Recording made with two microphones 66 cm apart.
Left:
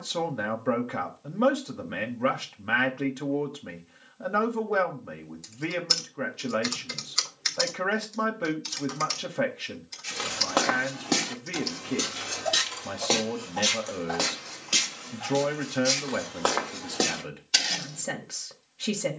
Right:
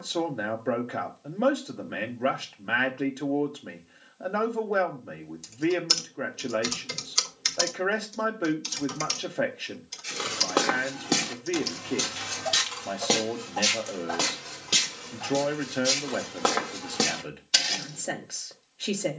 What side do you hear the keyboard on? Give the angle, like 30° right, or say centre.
60° right.